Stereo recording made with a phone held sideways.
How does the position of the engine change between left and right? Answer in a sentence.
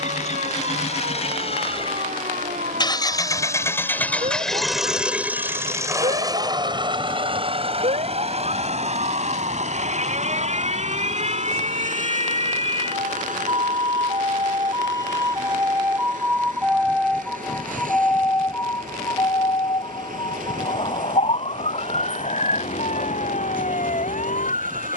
In this clip you hear the engine move to the right.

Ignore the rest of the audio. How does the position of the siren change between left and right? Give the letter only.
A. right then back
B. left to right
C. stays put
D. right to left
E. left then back
D.